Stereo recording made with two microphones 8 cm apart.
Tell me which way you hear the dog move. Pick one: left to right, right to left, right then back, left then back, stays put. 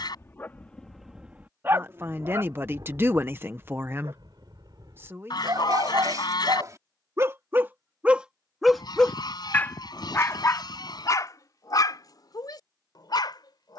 right then back.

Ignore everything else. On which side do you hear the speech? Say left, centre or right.
right.